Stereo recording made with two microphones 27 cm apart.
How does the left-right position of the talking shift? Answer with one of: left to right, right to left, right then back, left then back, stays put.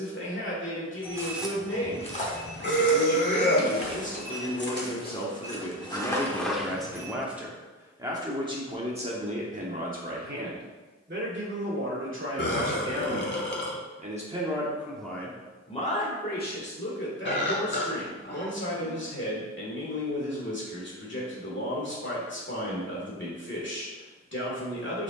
right then back.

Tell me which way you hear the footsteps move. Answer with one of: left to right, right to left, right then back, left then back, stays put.
left then back.